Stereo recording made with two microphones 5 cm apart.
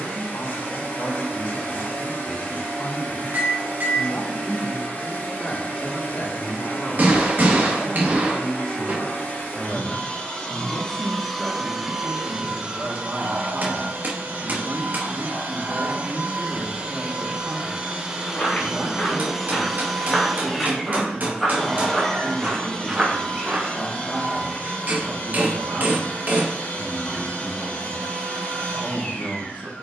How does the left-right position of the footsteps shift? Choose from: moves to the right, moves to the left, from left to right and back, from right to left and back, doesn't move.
moves to the right.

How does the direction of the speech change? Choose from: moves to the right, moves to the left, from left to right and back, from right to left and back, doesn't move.
moves to the right.